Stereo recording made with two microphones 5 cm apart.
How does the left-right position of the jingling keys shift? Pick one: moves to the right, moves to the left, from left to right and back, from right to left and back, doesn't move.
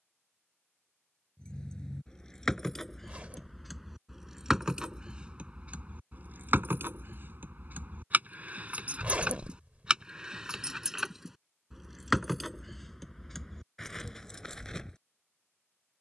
from left to right and back.